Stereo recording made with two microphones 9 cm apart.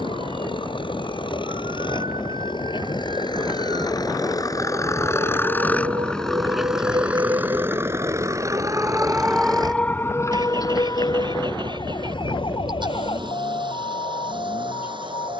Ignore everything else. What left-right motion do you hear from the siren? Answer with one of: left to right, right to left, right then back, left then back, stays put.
right to left.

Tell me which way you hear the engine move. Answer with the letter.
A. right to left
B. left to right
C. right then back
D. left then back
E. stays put
B.